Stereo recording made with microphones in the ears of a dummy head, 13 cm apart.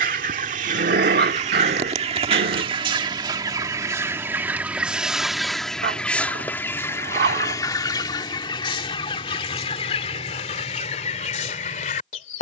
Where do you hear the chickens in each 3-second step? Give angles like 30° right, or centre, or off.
40° right, 10° right, 20° left, 40° left.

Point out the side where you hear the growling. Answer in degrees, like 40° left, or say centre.
70° right.